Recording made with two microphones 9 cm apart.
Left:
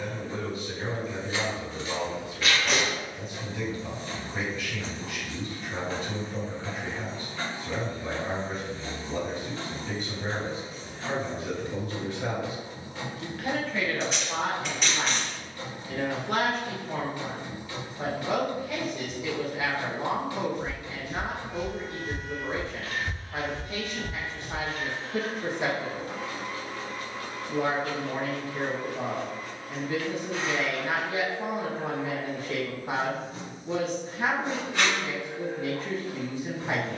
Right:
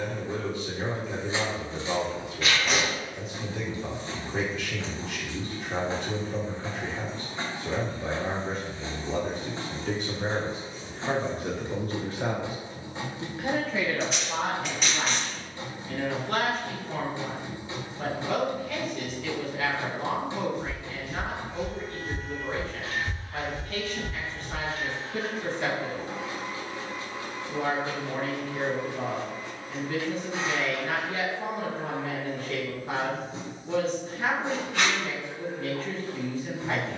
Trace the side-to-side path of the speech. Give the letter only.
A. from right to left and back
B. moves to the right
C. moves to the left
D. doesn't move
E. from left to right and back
C.